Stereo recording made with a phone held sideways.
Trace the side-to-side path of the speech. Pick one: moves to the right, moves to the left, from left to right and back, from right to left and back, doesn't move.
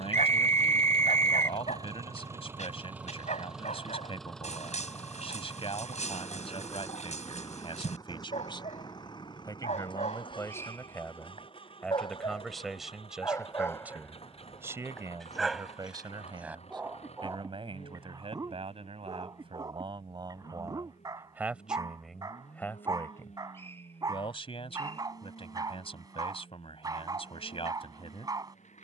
from left to right and back.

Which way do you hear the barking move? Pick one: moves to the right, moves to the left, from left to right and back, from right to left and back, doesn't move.
moves to the right.